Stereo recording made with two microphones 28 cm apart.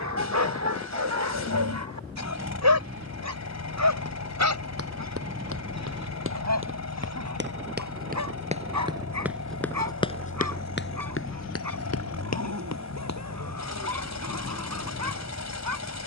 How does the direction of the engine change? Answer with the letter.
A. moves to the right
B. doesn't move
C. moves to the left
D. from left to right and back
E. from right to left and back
B.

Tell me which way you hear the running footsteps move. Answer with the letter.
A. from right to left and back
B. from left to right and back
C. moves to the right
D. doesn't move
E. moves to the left
E.